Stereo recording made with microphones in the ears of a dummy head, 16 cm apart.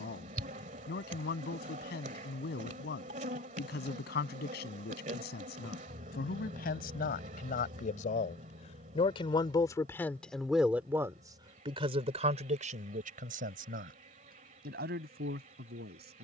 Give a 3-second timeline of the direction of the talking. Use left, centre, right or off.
left, left, left, centre, right, right.